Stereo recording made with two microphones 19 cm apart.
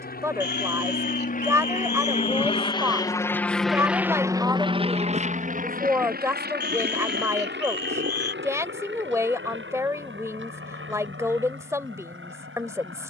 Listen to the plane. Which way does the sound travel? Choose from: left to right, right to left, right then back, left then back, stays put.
left to right.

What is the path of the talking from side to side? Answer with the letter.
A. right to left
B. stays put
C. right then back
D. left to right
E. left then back
B.